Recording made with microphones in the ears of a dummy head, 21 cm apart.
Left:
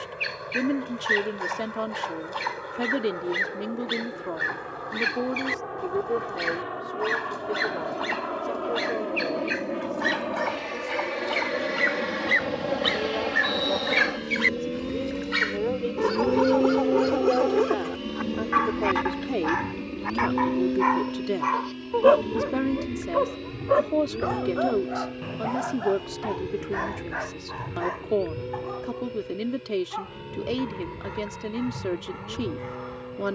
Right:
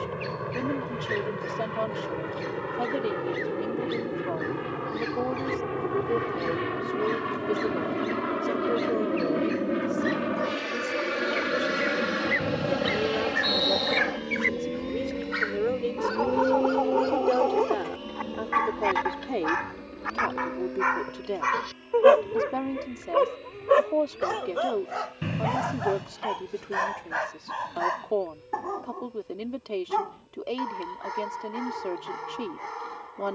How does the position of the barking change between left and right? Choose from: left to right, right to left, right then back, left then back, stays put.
left to right.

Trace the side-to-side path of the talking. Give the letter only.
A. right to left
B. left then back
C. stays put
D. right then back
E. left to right
D.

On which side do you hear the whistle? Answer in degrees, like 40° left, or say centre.
30° right.